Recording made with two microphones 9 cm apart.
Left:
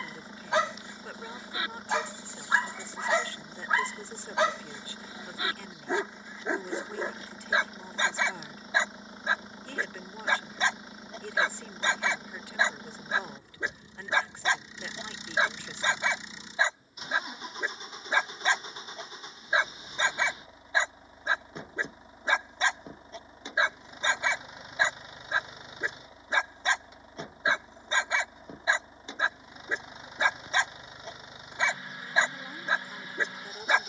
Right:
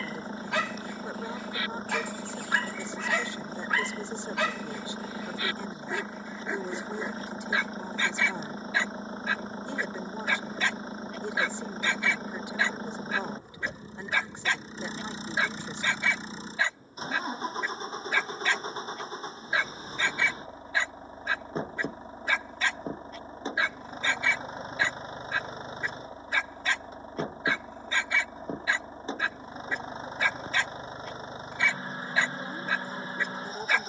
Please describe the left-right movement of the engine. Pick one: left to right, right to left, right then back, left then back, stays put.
stays put.